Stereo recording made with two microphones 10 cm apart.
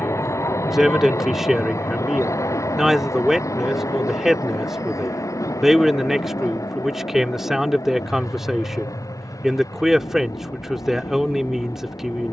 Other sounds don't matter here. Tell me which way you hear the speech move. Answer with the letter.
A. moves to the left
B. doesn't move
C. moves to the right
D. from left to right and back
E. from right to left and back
B.